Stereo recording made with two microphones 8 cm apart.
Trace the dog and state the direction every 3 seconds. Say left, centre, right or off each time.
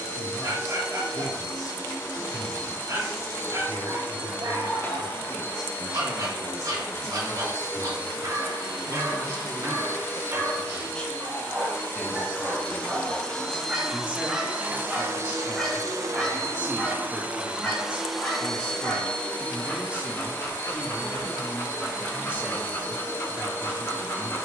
right, right, right, right, centre, centre, left, left.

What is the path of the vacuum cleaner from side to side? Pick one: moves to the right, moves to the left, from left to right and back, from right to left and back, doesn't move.
from left to right and back.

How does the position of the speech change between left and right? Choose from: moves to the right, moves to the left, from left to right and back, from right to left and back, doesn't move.
moves to the right.